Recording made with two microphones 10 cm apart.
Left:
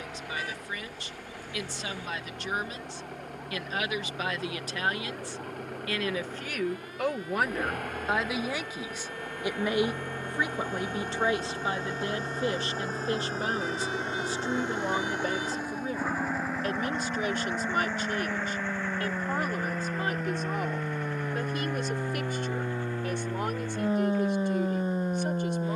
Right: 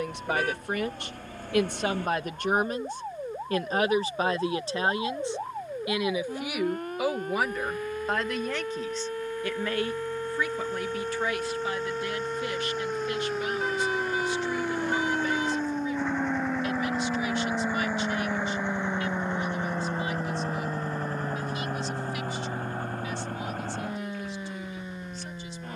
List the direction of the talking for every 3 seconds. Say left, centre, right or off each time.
right, right, centre, left, left, left, left, left, left.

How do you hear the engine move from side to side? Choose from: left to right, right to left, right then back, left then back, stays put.
left to right.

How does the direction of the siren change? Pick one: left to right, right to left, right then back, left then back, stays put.
right to left.